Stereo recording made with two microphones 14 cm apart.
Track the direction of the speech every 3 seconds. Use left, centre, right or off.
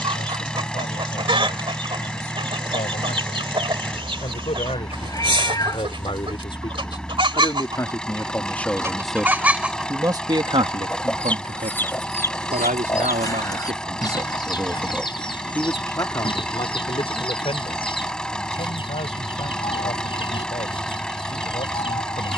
left, left, left, right, right, left, left, left.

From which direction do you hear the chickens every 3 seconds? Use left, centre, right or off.
right, right, right, centre, left, left, left, left.